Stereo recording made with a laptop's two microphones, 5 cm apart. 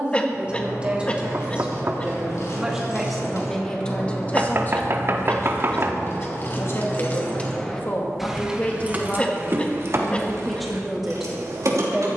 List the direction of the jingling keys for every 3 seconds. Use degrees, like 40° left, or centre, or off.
70° left, 60° left, 20° left, 60° right.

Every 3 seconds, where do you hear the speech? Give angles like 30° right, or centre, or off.
20° right, 30° left, 40° left, centre.